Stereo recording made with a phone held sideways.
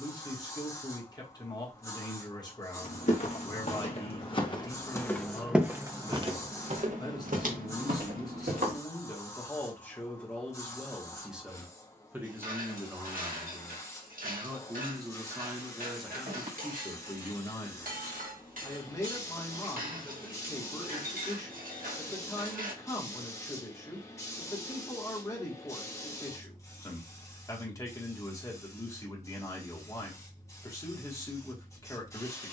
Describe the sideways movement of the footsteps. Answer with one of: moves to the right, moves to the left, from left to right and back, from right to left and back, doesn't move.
moves to the right.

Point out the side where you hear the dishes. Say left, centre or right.
right.